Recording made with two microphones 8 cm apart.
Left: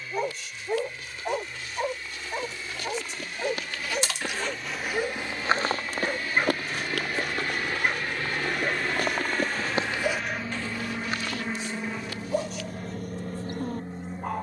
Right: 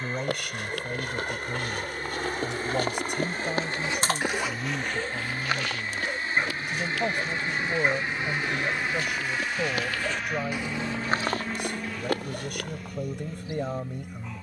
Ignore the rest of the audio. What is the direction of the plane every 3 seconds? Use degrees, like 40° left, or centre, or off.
50° right, 40° right, 20° right, centre, 30° left.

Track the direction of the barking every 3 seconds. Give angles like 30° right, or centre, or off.
40° left, 20° left, centre, 30° left, 50° left.